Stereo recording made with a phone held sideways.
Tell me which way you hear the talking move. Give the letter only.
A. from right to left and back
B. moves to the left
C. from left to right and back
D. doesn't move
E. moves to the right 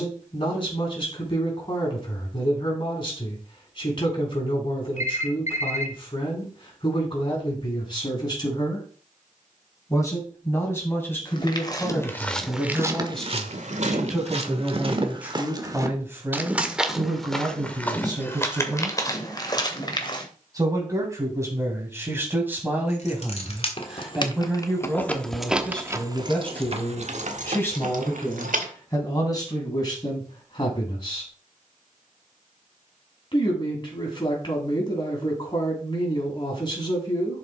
C.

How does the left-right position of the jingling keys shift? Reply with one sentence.
You can hear the jingling keys travel towards the right.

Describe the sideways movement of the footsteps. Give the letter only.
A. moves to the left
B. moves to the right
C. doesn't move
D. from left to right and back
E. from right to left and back
D.